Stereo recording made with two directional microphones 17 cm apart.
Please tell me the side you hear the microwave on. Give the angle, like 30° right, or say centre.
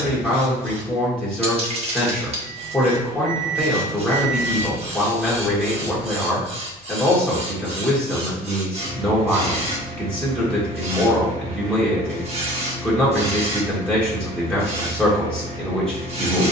50° right.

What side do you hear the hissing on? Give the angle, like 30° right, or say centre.
40° right.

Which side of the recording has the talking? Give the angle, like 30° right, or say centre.
10° left.